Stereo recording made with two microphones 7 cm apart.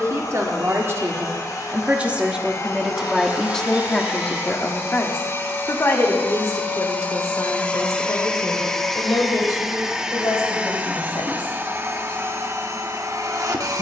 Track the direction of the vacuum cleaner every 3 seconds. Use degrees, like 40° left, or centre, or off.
50° left, 40° left, 20° left, 20° right, 40° right.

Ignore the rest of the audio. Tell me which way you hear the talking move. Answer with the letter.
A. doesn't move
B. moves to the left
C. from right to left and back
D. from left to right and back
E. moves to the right
B.